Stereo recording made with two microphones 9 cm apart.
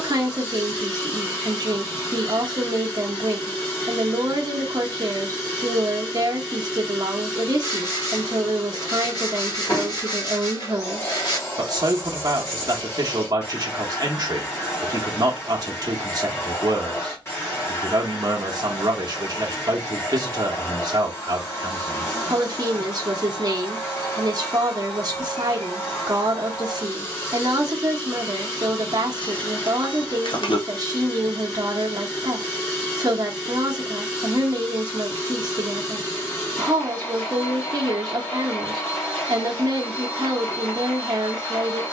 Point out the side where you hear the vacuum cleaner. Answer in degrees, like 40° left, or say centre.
30° left.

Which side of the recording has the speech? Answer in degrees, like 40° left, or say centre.
40° right.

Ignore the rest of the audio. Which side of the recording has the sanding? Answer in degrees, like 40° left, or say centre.
50° left.